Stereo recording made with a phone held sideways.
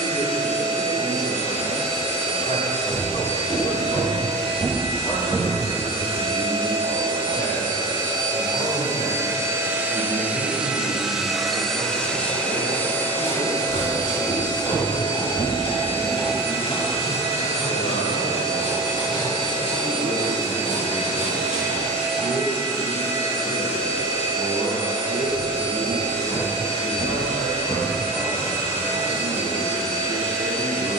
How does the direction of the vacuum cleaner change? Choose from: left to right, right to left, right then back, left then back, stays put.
right to left.